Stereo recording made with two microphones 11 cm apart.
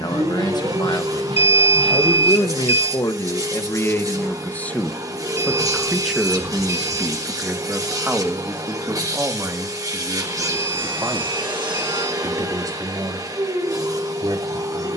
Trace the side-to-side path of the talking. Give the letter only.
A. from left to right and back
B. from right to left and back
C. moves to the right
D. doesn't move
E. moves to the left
C.